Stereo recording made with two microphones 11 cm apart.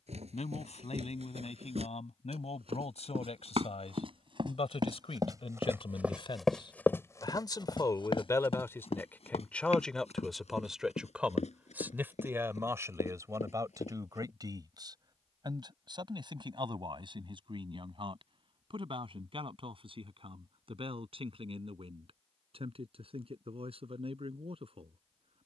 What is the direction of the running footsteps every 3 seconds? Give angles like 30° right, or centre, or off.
70° right, 40° right, 30° left, 70° left, 80° left, off, off, off, off.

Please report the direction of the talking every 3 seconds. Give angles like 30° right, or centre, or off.
80° left, 60° left, 40° left, centre, 30° right, 40° right, 50° right, 60° right, 60° right.